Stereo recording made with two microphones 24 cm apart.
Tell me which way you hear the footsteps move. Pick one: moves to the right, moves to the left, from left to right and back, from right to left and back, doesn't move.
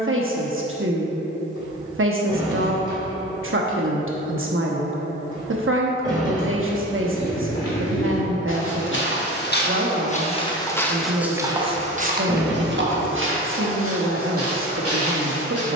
moves to the right.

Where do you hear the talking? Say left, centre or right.
right.